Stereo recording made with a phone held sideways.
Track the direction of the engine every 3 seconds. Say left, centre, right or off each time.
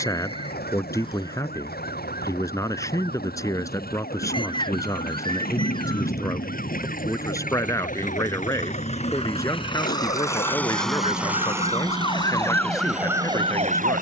left, left, left, centre, right.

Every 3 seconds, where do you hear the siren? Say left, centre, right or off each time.
left, left, left, left, centre.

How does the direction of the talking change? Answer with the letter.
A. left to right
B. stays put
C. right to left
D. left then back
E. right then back
B.